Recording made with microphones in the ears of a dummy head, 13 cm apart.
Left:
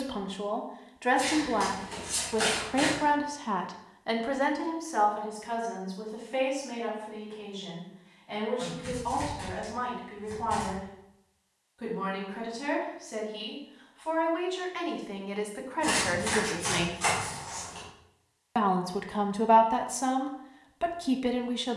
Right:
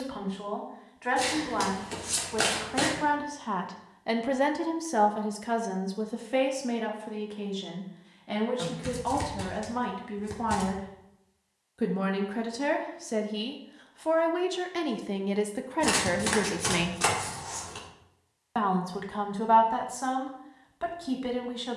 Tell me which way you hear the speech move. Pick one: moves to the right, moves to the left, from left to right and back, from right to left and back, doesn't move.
from left to right and back.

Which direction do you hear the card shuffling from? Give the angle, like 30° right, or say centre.
70° right.